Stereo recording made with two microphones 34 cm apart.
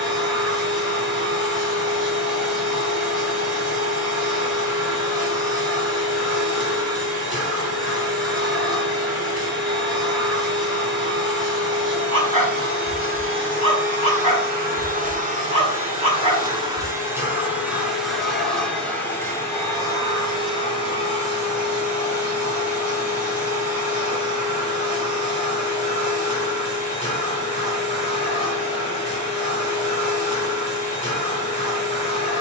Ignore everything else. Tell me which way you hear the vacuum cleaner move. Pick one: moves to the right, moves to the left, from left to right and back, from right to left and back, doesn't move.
moves to the left.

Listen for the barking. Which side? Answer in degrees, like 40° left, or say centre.
20° left.